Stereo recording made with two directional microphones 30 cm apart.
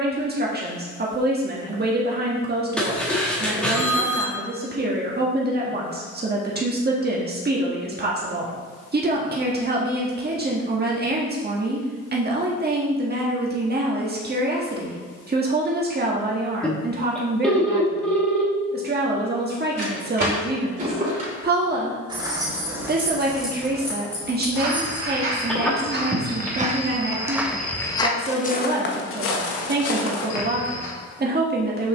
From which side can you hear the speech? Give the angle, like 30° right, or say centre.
30° right.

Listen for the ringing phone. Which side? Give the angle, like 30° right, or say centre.
centre.